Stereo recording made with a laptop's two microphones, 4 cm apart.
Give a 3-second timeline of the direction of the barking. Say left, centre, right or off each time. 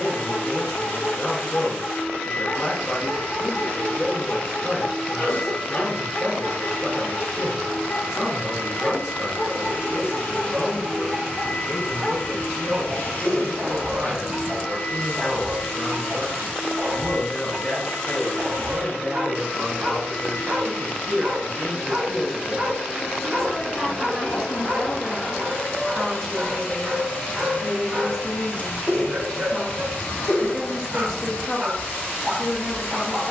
left, left, left, centre, right, right, right, right, right, right, right.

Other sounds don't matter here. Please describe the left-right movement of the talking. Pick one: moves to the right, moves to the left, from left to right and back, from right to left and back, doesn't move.
from left to right and back.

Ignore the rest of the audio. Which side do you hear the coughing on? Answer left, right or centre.
left.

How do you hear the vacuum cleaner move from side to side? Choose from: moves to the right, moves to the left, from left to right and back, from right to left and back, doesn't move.
doesn't move.